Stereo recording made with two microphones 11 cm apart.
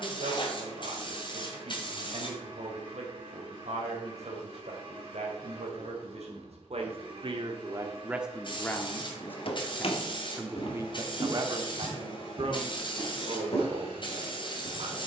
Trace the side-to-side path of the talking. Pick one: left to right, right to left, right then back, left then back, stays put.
left then back.